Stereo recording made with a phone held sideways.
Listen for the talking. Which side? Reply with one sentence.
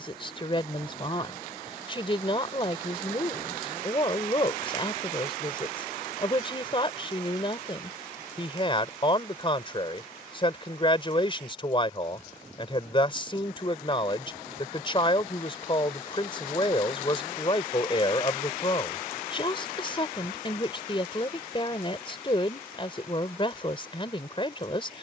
In this clip you hear the talking on the left.